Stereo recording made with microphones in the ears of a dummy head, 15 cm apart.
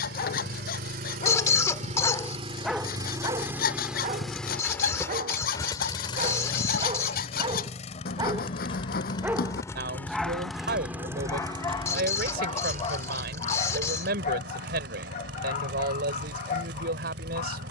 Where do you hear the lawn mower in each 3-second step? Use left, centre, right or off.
right, centre, left, centre, right, right.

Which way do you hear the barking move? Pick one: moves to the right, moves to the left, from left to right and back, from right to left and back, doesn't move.
from left to right and back.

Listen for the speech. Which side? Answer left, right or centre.
right.